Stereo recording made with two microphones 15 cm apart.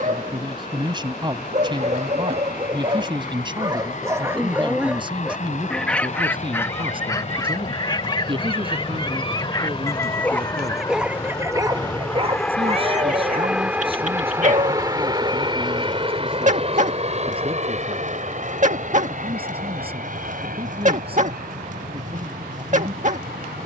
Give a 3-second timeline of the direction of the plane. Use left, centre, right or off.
left, left, left, left, centre, right, right, right.